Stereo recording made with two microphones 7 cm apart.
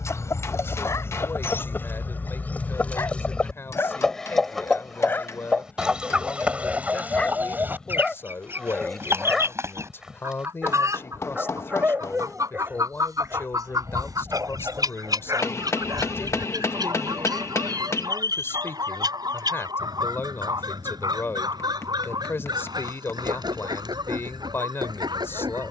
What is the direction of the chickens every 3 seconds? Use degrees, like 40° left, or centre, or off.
30° left, centre, 20° right, 40° right, 50° right, 60° right, 60° right, 70° right, 70° right.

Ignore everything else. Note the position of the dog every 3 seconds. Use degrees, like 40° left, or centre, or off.
40° left, 30° left, 10° left, 10° right, 30° right, 50° right, 60° right, 70° right, 70° right.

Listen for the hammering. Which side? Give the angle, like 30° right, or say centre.
40° left.